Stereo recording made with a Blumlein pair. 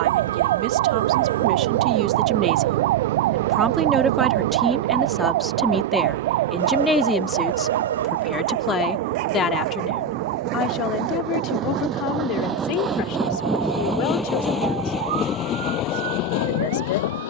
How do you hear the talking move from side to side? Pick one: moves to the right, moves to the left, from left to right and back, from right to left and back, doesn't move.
moves to the left.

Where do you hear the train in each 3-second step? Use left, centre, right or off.
right, right, right, right, centre, left.